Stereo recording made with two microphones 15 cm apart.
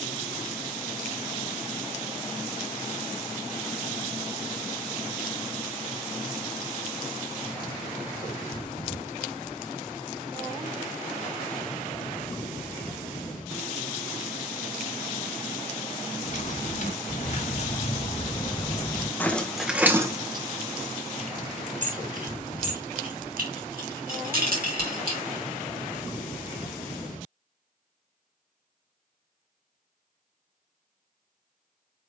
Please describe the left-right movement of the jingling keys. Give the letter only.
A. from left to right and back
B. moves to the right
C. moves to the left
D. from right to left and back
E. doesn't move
B.